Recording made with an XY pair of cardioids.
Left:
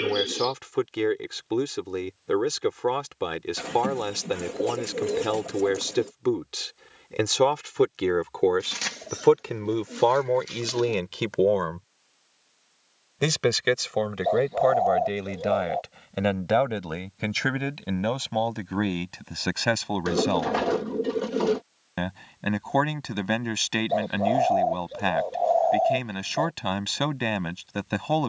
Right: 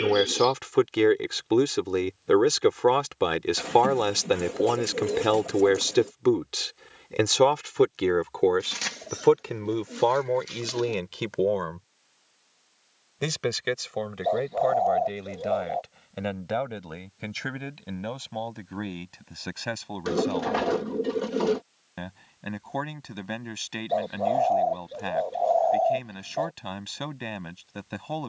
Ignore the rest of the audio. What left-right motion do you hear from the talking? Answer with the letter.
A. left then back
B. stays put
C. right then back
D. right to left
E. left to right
D.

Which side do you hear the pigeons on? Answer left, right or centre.
centre.